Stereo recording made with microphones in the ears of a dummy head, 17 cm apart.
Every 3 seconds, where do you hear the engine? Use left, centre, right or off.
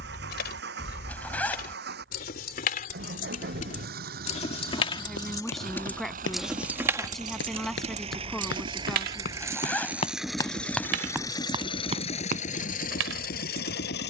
right, right, right, centre, left.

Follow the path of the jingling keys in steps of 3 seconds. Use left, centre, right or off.
left, left, right, right, right.